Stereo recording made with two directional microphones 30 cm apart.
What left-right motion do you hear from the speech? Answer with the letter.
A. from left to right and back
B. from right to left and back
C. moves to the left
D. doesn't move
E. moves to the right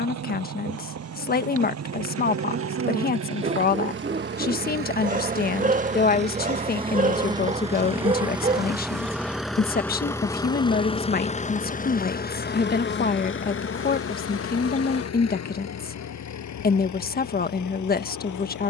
D.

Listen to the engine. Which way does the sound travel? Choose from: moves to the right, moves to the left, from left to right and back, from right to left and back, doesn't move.
moves to the left.